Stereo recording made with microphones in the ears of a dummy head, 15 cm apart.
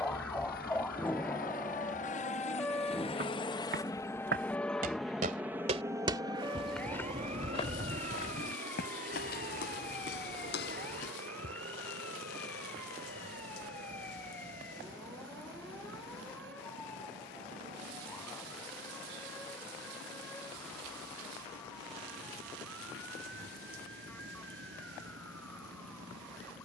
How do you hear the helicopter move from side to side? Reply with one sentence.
You can hear the helicopter travel towards the right.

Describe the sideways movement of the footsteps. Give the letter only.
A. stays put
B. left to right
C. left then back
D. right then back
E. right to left
E.